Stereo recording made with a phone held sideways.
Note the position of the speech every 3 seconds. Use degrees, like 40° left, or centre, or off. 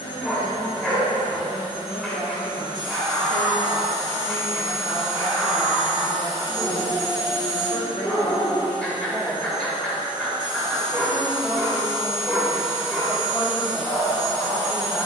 70° left, 60° left, 30° left, centre, 10° right.